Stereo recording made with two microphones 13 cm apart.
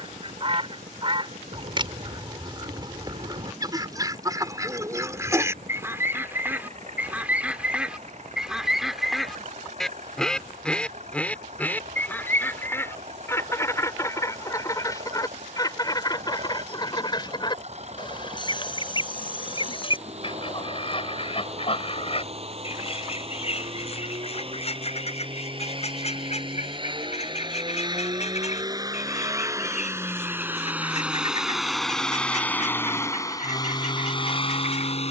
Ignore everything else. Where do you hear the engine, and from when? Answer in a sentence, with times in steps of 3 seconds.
You can hear the engine on the right from 0 s, in the centre from 30 s and on the left from 33 s.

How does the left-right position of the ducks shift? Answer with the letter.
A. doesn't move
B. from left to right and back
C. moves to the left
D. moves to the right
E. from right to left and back
C.